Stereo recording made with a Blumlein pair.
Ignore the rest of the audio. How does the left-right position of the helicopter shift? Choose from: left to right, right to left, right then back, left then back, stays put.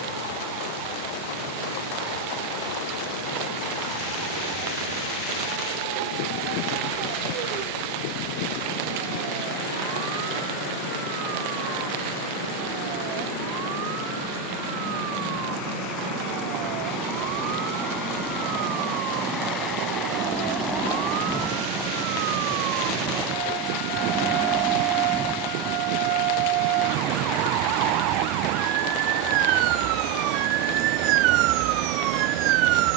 left to right.